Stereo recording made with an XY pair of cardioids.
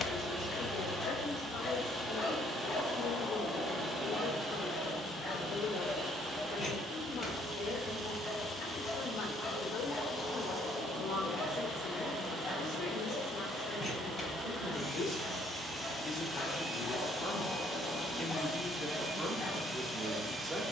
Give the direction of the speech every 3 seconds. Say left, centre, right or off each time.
left, left, left, left, left, left, centre.